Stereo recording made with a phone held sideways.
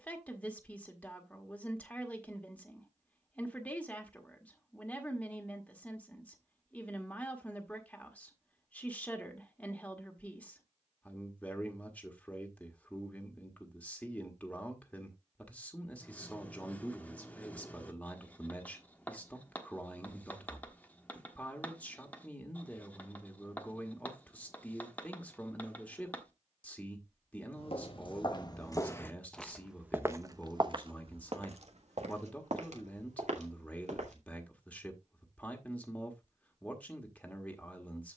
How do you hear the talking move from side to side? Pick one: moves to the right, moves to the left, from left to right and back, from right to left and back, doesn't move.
doesn't move.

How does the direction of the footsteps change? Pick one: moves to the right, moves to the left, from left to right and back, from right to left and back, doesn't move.
moves to the right.